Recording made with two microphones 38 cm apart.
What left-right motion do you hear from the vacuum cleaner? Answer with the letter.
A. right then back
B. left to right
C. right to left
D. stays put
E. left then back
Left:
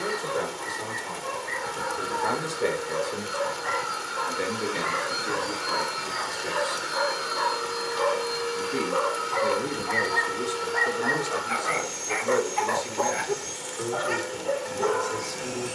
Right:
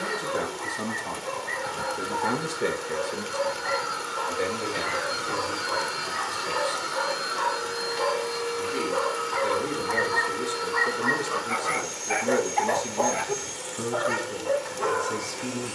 A.